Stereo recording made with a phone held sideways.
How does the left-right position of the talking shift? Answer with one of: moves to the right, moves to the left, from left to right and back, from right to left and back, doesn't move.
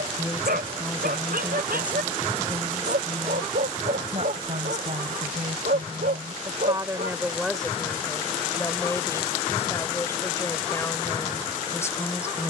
from left to right and back.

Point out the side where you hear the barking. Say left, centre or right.
right.